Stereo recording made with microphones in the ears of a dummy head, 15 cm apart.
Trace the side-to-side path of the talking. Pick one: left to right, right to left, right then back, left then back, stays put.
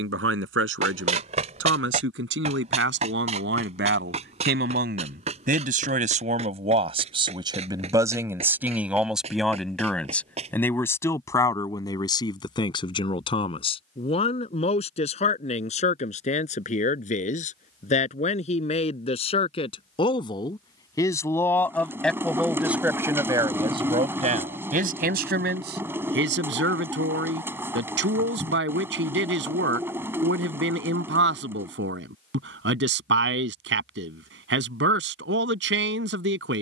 left then back.